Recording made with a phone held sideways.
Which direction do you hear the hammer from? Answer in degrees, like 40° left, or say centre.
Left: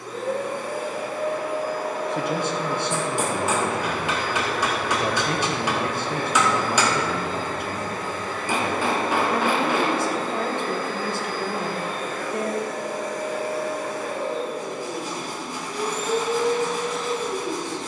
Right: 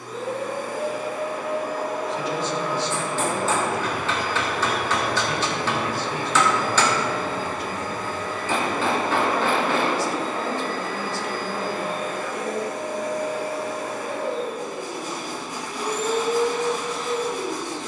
10° left.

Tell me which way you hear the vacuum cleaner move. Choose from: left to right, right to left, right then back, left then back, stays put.
stays put.